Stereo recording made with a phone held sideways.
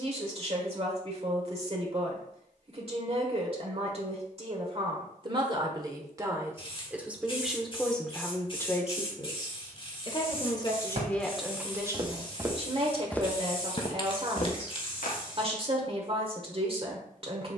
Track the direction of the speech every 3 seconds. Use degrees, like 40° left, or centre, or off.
40° right, 40° right, centre, 10° left, 40° right, 40° right.